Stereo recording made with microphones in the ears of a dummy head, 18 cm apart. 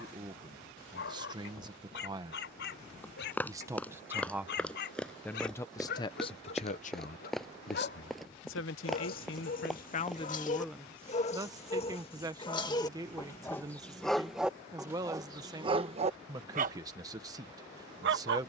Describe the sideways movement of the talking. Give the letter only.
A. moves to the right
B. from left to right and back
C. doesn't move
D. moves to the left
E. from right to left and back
E.